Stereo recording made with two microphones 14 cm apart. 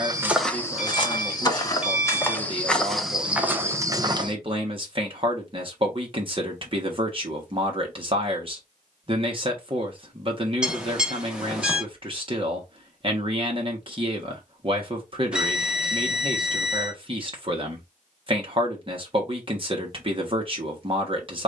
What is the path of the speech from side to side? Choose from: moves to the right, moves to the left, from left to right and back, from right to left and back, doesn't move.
doesn't move.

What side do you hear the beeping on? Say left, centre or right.
centre.